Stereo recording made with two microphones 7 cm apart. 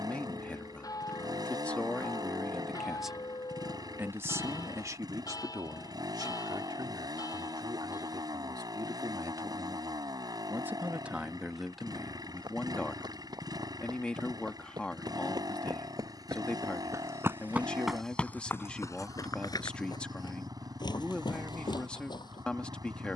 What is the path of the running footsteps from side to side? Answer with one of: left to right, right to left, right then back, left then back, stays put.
right to left.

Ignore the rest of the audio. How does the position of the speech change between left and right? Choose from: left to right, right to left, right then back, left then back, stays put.
right then back.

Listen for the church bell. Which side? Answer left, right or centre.
left.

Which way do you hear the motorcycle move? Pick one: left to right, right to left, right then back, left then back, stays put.
stays put.